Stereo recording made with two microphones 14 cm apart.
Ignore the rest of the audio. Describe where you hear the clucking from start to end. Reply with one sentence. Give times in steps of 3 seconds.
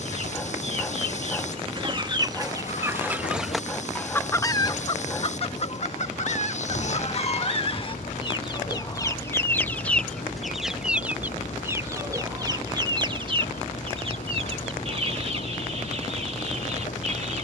In this clip you hear the clucking on the right from 0 s, on the left from 3 s, in the centre from 9 s and on the right from 12 s.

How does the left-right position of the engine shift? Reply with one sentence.
You can hear the engine stay put.